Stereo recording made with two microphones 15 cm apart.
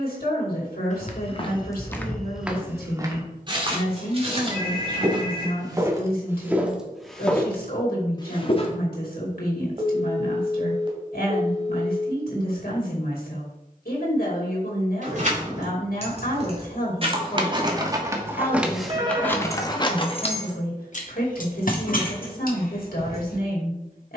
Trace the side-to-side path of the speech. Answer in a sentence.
In this clip you hear the speech stay in one place.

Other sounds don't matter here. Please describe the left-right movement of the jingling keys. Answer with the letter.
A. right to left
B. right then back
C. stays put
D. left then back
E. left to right
A.